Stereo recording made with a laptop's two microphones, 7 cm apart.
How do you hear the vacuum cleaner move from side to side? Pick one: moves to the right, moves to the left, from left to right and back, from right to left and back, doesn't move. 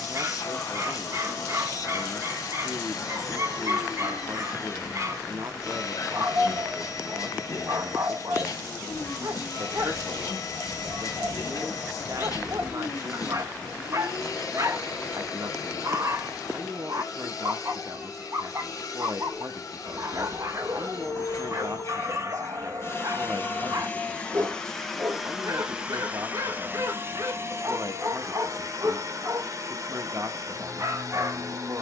moves to the right.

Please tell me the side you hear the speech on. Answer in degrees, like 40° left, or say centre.
50° right.